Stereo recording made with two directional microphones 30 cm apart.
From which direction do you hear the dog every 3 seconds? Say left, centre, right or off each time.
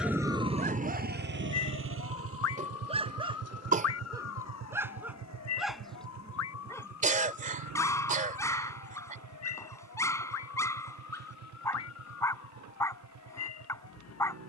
right, centre, centre, centre, centre.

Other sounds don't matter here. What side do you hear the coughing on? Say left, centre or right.
right.